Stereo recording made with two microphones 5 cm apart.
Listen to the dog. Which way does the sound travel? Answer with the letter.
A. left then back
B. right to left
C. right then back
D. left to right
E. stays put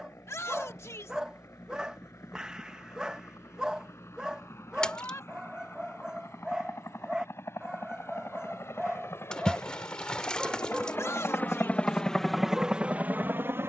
E.